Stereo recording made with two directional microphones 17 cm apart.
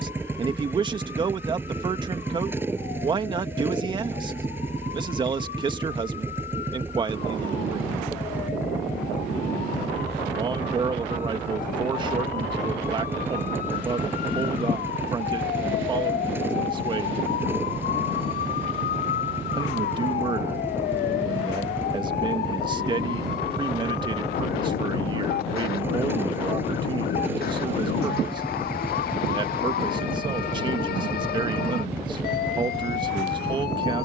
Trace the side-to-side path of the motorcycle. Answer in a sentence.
You can hear the motorcycle stay put.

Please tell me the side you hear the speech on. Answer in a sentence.
You can hear the speech on the right.